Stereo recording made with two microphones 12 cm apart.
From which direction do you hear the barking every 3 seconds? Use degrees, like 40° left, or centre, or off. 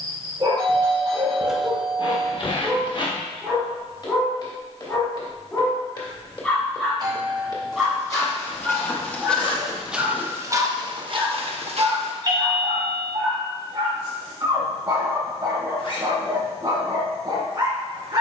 30° right, 10° left, centre, 30° right, 40° right, 40° right.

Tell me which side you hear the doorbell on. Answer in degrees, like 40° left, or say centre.
40° right.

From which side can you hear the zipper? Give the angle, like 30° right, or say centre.
40° left.